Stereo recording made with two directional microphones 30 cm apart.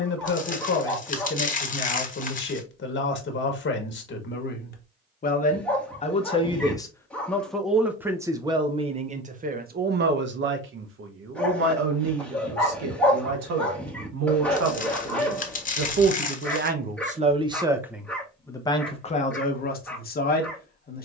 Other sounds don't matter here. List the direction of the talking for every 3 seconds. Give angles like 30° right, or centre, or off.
40° left, 40° left, centre, 40° right, 60° right, 30° right, 30° left.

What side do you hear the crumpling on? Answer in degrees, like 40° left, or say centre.
30° left.